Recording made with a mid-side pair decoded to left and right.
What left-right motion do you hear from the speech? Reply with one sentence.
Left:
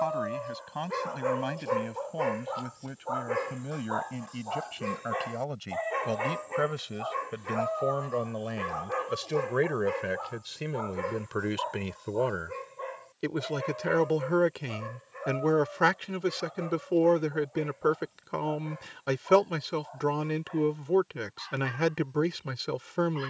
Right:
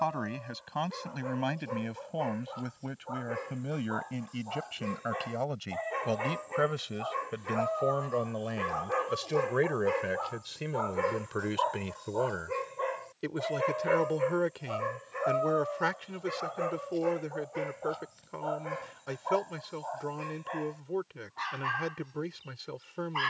In this clip you hear the speech go from the right side to the left.